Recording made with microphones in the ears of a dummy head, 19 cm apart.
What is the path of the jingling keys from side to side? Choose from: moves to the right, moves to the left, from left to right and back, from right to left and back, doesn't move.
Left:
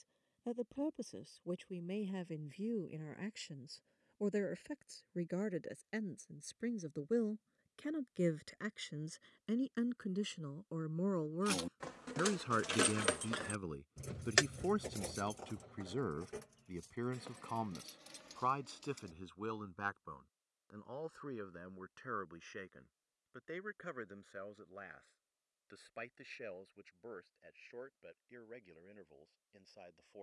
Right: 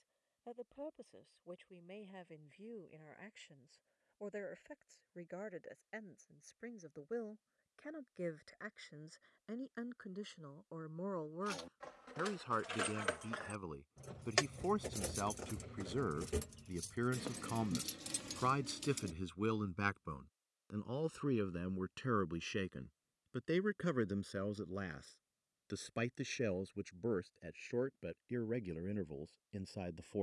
moves to the right.